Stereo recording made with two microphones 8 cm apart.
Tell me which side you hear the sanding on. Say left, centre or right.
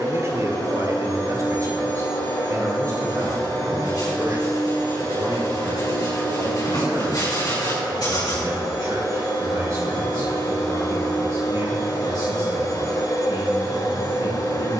left.